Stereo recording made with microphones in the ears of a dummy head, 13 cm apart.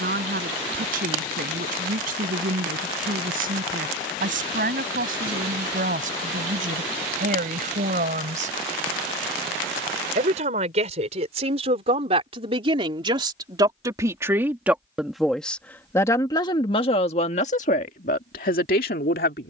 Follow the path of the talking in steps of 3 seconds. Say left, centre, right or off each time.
right, right, right, right, right, left, left.